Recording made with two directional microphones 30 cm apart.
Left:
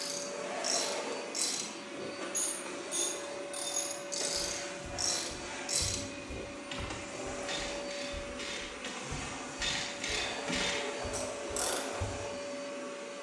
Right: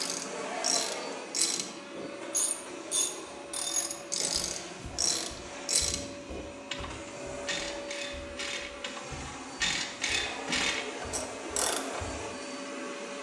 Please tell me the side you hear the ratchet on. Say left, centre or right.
right.